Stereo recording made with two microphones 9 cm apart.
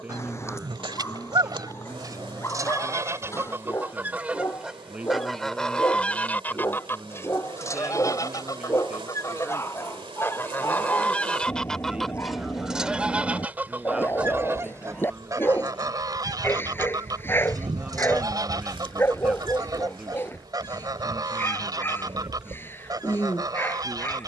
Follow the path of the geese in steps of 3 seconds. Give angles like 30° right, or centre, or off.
50° right, 10° right, 30° left, 20° left, 20° right, 40° right, 40° right, 40° right.